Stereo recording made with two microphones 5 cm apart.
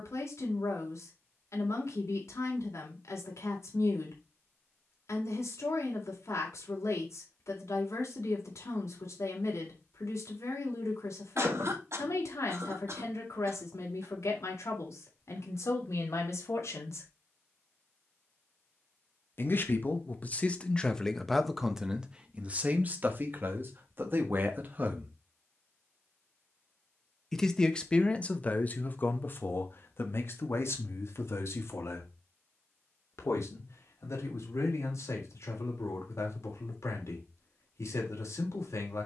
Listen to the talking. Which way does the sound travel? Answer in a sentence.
In this clip you hear the talking go right and come back.